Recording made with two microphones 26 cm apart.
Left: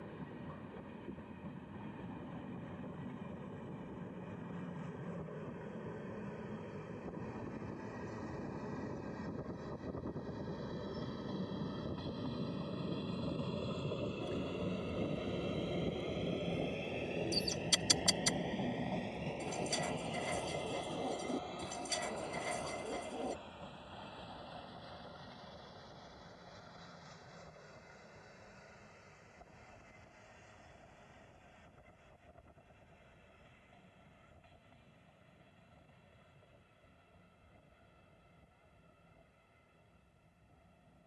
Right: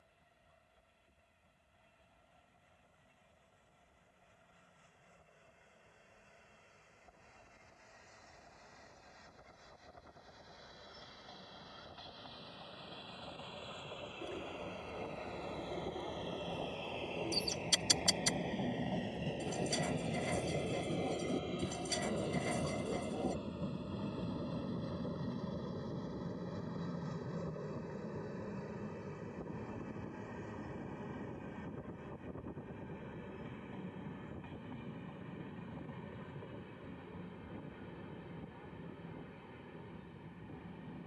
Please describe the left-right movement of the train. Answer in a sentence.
You can hear the train go from the left side to the right.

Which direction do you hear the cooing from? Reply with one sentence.
In this clip you hear the cooing in the centre.